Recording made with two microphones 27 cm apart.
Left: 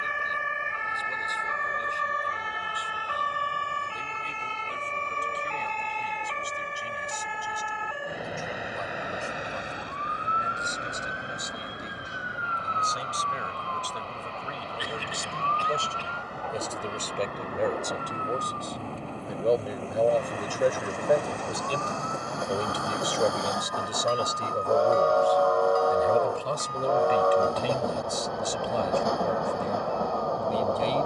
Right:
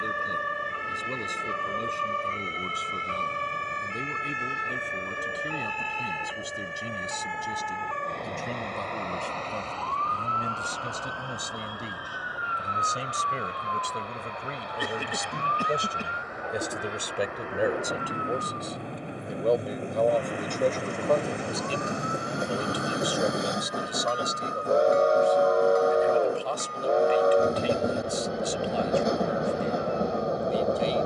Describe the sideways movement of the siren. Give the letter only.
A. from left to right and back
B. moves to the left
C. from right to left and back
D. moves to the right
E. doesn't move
B.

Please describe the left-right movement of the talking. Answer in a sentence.
In this clip you hear the talking go from the right side to the left.